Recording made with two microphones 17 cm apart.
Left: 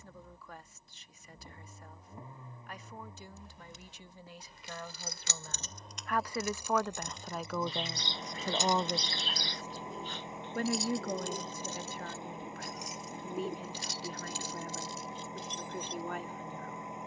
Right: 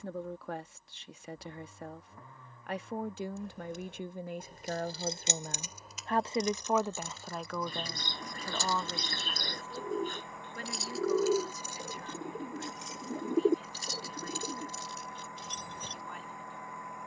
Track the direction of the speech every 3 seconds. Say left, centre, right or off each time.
right, right, centre, left, left, left.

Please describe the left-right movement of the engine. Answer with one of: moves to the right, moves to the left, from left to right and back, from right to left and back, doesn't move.
doesn't move.